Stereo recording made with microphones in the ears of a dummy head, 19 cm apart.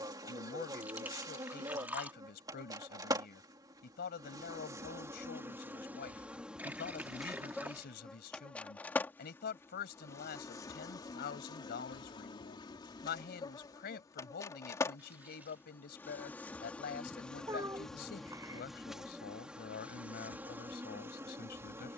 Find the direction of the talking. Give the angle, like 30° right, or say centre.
50° left.